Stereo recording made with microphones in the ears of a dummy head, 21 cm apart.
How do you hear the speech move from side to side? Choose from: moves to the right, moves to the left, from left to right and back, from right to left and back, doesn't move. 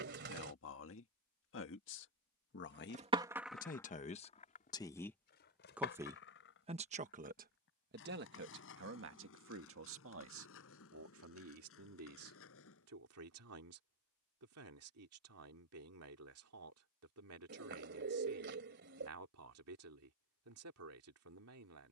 moves to the right.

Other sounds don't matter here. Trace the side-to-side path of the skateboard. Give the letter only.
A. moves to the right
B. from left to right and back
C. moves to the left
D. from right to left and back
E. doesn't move
C.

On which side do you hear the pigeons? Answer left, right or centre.
right.